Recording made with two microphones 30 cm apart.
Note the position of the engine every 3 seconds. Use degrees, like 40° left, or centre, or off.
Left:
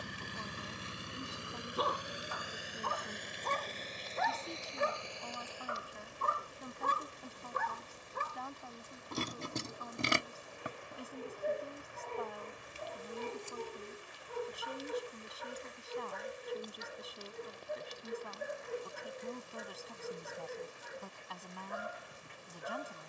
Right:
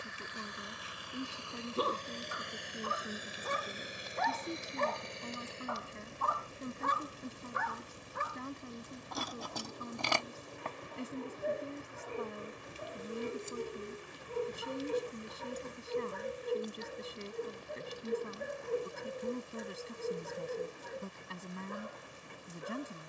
20° left, 20° right, 30° right, 40° right, 50° right, 50° right, 50° right, 50° right.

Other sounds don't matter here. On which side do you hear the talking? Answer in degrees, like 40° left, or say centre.
30° right.